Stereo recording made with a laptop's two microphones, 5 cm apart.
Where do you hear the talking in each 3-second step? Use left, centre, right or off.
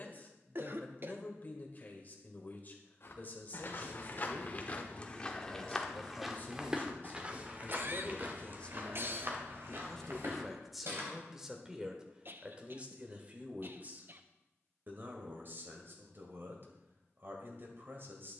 left, left, left, centre, right, right.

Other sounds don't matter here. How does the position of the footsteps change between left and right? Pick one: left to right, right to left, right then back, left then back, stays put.
left to right.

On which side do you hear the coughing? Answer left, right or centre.
right.